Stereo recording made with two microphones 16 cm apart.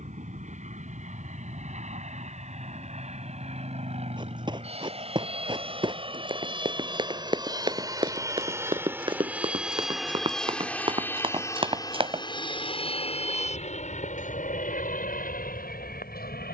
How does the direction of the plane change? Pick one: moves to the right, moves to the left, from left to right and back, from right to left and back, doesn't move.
moves to the left.